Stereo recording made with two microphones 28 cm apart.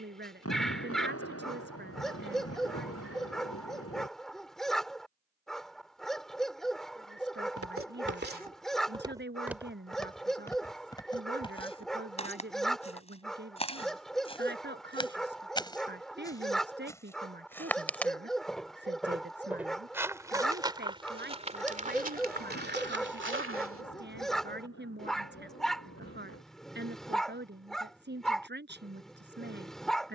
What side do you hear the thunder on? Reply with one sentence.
You can hear the thunder on the left.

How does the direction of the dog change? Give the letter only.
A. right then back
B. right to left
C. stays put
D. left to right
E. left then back
C.